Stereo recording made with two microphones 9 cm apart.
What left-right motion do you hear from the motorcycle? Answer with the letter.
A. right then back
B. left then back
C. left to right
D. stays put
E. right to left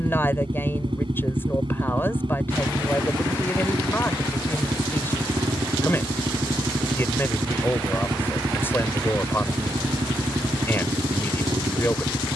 D.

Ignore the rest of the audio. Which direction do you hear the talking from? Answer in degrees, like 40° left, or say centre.
20° left.